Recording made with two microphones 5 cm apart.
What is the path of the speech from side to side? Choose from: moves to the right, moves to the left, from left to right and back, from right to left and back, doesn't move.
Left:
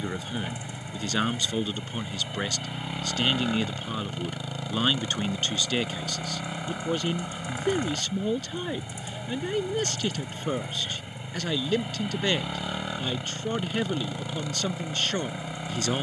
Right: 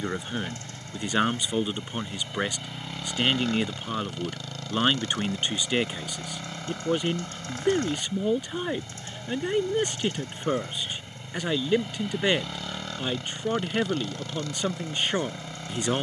doesn't move.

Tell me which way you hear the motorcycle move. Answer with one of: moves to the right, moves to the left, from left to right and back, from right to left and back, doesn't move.
doesn't move.